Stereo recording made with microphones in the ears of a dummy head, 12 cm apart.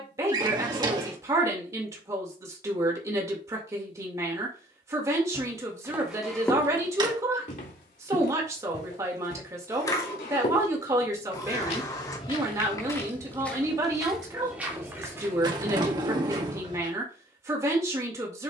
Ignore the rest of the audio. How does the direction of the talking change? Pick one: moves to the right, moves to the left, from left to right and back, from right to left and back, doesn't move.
doesn't move.